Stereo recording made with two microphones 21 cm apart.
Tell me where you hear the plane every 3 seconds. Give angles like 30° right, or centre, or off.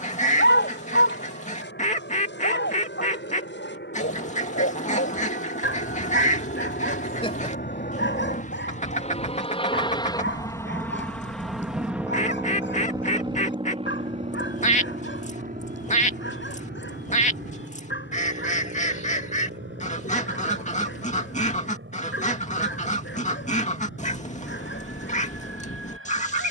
80° left, 70° left, 50° left, 10° left, 20° right, 40° right, 50° right, 60° right, 60° right.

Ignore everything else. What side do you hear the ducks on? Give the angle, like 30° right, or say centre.
40° left.